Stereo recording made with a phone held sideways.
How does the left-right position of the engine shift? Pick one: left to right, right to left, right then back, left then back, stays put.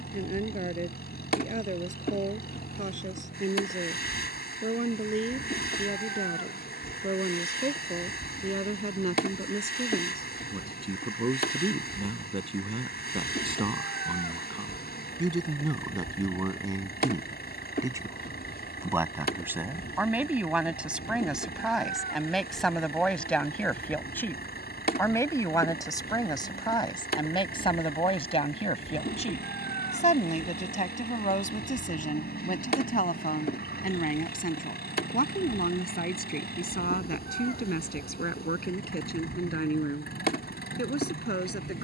stays put.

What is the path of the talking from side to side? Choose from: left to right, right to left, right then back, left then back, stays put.
right to left.